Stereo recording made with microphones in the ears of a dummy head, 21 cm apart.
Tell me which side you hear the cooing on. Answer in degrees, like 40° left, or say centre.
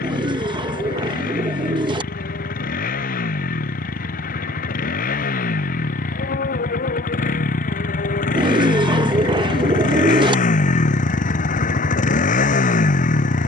20° right.